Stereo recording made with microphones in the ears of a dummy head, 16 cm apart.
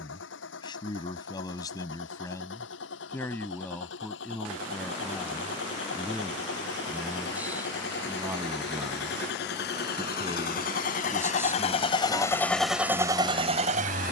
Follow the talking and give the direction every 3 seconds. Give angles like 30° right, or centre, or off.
20° left, 10° left, 10° right, 20° right, centre.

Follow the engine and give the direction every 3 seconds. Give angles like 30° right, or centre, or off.
80° left, 80° left, 70° left, 50° left, 20° right.